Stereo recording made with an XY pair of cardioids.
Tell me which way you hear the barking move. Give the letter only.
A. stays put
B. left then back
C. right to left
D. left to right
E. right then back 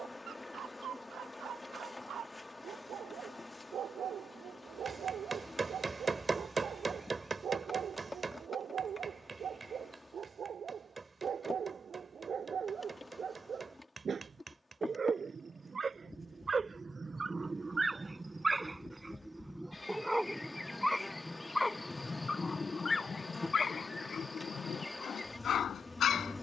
C.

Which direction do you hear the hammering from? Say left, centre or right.
right.